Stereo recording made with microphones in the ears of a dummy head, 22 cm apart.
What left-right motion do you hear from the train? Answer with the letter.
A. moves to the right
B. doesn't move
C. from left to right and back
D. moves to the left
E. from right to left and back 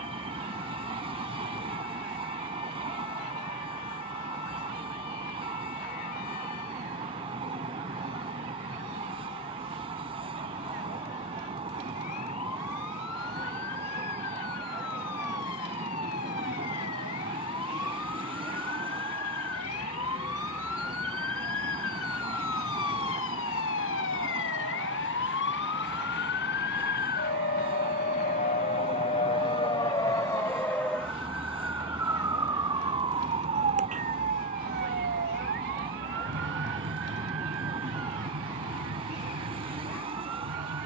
B.